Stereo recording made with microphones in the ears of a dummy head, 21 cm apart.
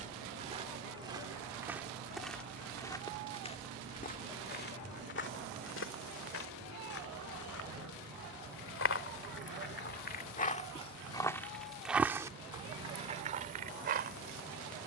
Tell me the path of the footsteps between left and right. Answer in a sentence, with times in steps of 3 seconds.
You can hear the footsteps in the centre from 0 s, on the left from 3 s and on the right from 12 s.